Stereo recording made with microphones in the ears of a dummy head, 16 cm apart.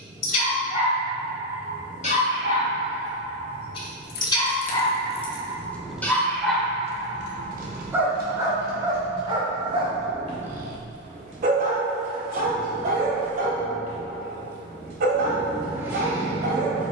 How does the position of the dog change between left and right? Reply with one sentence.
In this clip you hear the dog move to the right.